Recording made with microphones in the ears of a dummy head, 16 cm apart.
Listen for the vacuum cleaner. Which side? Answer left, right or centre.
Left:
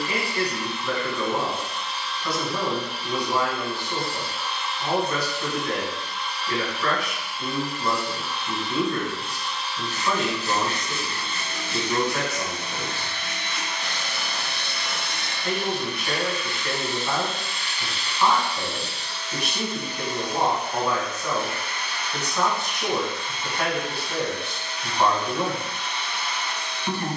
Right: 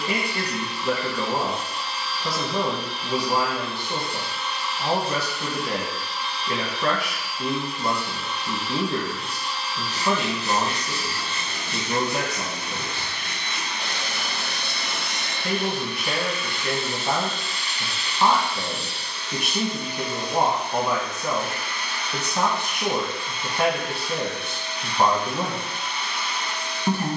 right.